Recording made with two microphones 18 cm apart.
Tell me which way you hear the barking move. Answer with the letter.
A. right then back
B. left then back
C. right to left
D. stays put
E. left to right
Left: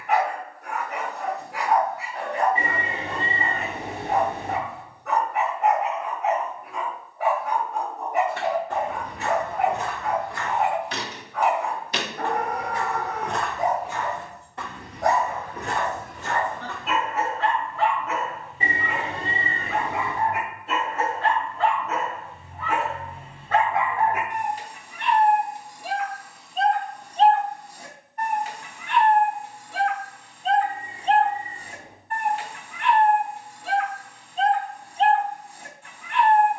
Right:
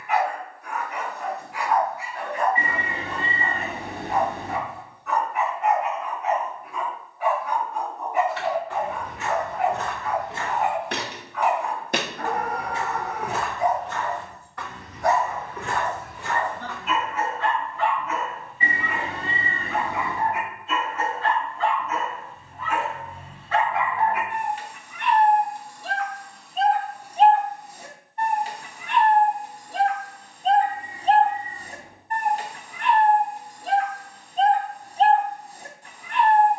E.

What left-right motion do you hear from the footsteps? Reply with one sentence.
You can hear the footsteps go right and come back.